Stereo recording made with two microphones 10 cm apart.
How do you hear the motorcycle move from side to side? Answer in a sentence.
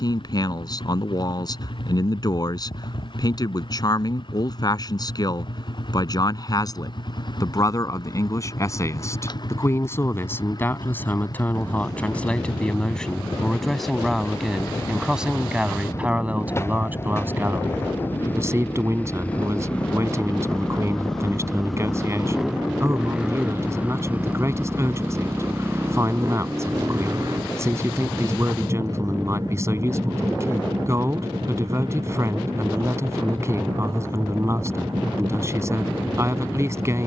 You can hear the motorcycle move from left to right.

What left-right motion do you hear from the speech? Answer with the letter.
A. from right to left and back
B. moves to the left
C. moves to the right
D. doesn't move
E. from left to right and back
C.